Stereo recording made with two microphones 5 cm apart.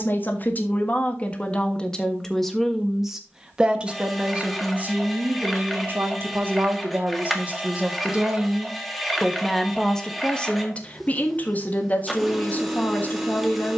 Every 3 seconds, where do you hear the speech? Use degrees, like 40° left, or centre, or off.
20° left, 30° right, 30° right, 20° left, 40° left.